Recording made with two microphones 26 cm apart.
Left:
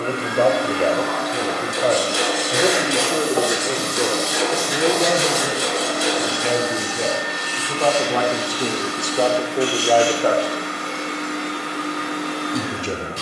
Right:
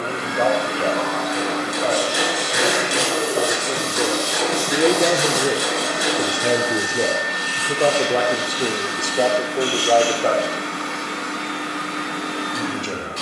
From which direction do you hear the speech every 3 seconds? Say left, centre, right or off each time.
left, centre, right, centre, left.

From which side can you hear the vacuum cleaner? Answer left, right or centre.
right.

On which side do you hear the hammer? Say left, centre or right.
left.